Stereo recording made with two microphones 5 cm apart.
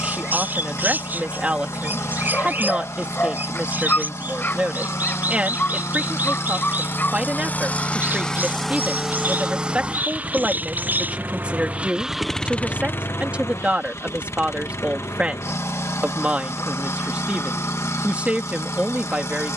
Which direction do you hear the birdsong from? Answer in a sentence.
You can hear the birdsong on the right.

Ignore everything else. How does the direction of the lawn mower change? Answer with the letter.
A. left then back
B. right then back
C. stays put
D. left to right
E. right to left
B.